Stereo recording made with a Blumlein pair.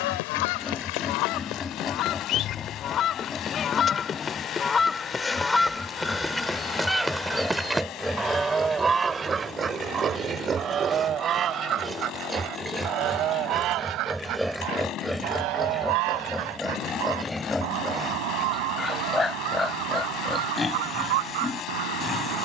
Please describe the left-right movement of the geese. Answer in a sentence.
In this clip you hear the geese move to the right.